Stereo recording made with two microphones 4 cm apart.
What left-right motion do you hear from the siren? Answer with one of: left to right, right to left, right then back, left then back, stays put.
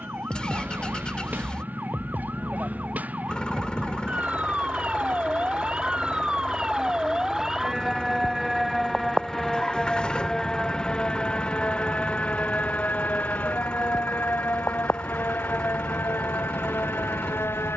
right to left.